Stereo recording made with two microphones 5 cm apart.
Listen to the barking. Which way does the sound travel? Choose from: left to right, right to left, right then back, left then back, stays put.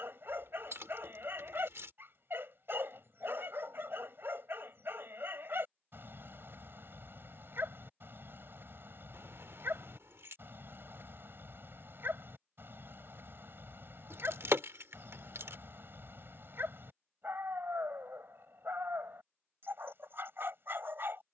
stays put.